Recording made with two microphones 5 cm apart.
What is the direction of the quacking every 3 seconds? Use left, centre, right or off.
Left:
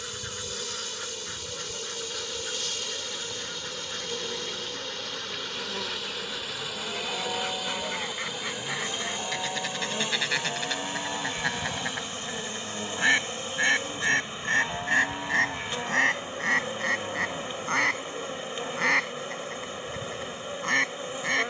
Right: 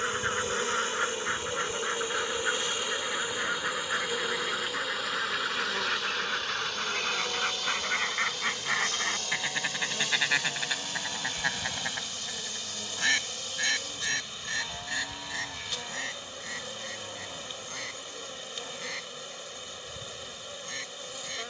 right, right, right, centre, left, left, left.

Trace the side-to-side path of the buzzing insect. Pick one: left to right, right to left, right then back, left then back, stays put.
right to left.